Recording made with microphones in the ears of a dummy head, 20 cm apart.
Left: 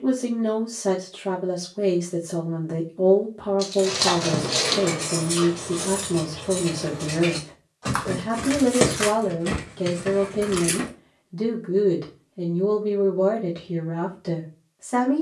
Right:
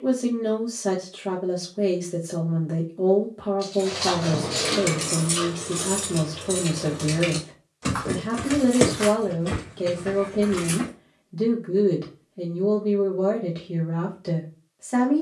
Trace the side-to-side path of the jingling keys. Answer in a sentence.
You can hear the jingling keys go right and come back.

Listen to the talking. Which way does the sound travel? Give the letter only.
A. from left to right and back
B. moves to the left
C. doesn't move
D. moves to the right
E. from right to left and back
C.